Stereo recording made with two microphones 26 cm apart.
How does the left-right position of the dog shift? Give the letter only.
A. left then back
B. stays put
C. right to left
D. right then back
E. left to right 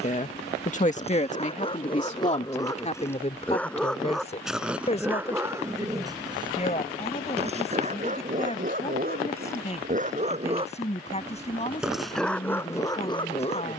D.